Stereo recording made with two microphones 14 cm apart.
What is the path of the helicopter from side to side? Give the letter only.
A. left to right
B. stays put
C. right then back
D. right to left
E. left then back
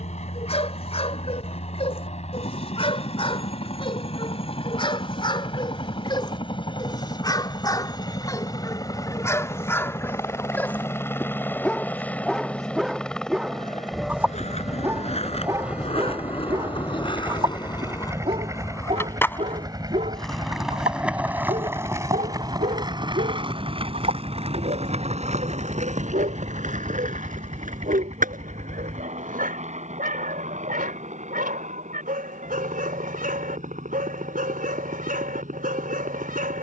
A.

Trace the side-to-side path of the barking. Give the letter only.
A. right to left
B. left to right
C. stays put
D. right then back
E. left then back
B.